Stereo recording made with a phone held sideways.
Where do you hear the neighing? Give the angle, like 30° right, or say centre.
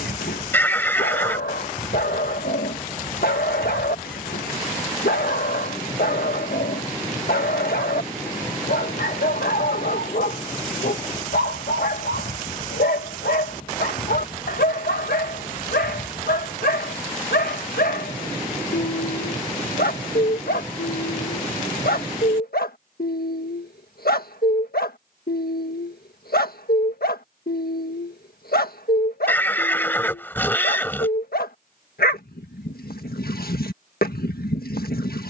10° left.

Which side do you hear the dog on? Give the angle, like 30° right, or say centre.
80° left.